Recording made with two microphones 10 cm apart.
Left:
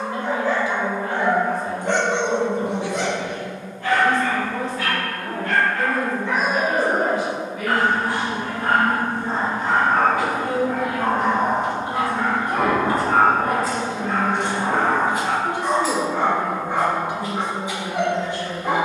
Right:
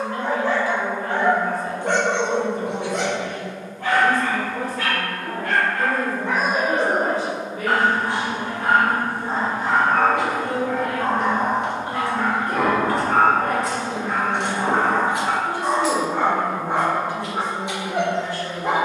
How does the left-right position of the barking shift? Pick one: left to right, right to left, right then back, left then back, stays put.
left then back.